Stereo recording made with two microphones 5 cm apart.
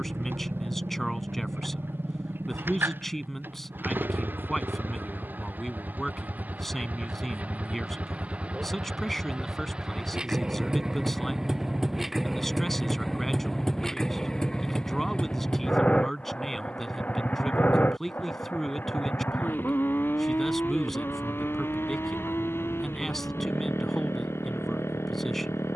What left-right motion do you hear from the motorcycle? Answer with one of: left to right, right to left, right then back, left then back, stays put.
right to left.